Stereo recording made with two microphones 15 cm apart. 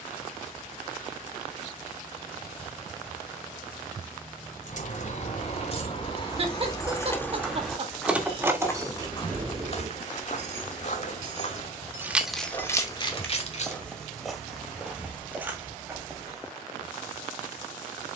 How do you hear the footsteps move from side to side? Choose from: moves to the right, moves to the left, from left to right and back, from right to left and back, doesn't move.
from right to left and back.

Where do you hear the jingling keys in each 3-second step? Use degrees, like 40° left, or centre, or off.
off, 50° left, 10° left, 40° right, 20° left, off.